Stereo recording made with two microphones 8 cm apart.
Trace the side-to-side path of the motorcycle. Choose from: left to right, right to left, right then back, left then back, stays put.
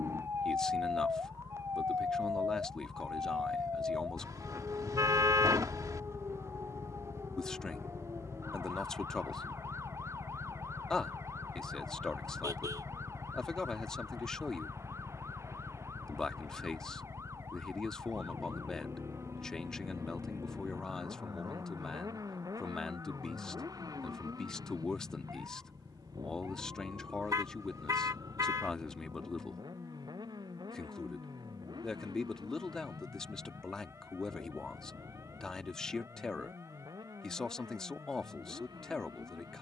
left to right.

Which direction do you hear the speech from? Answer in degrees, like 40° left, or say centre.
10° left.